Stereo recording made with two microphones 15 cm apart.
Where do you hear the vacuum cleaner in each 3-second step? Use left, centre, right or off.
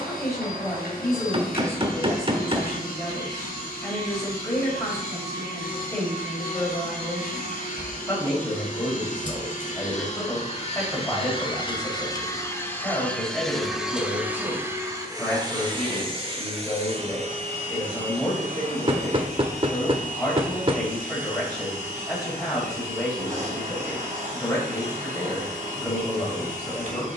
left, left, left, left, centre, right, right, right, right.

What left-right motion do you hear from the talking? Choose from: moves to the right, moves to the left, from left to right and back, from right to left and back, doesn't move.
doesn't move.